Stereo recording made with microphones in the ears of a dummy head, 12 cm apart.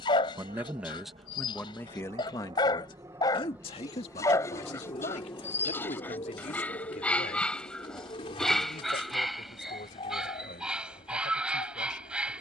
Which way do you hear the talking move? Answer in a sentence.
In this clip you hear the talking travel towards the left.